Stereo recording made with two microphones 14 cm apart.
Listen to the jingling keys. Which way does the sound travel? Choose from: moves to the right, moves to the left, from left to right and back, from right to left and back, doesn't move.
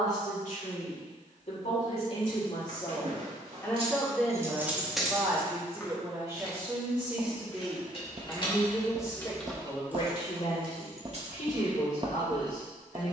from right to left and back.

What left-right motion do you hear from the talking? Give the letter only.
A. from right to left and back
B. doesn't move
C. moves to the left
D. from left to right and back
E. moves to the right
D.